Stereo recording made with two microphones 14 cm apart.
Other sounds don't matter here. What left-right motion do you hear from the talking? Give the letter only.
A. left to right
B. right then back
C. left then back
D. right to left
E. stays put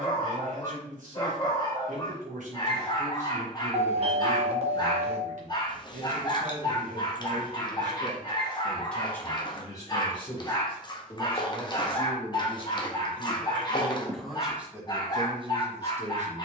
C.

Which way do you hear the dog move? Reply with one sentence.
You can hear the dog stay in one place.